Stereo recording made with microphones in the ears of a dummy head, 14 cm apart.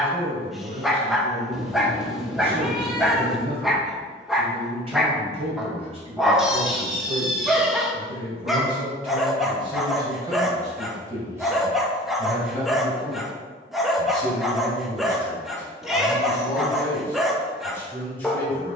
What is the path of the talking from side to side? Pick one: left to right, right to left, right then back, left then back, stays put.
right to left.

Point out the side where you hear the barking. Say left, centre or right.
centre.